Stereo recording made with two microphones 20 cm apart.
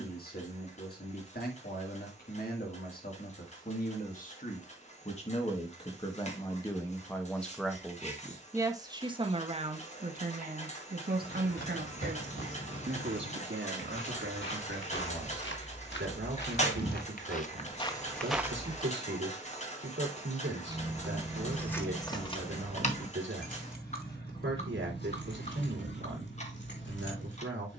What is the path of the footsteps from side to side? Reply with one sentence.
In this clip you hear the footsteps move from left to right.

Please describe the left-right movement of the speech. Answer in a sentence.
You can hear the speech move to the right.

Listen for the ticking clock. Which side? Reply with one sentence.
You can hear the ticking clock on the left.